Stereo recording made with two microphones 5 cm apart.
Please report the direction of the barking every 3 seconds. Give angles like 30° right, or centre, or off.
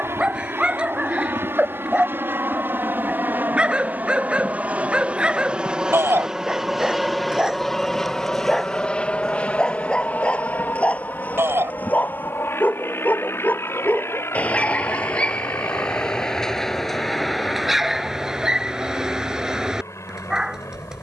20° right, 20° right, 10° right, 20° left, 30° left, 10° left, 20° right.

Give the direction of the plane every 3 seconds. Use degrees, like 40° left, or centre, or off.
60° right, 30° right, centre, 30° left, 50° left, 60° left, 60° left.